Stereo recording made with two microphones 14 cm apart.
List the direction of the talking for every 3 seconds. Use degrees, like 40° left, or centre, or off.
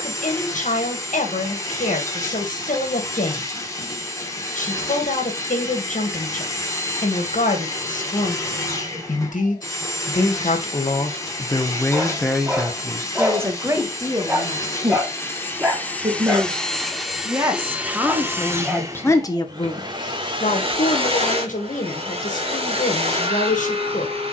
80° left, 80° left, 80° left, 50° left, 20° right, 30° right, 30° left, 80° left.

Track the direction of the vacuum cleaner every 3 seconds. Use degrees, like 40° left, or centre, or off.
20° left, 20° left, 20° left, 20° left, 20° left, 10° left, 30° right, 50° right.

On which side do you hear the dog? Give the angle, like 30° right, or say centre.
20° right.